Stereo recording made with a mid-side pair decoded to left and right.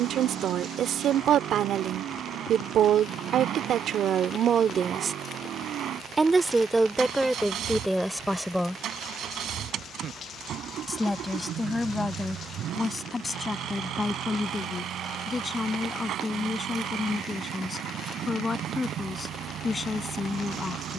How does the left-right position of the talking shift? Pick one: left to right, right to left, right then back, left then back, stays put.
right to left.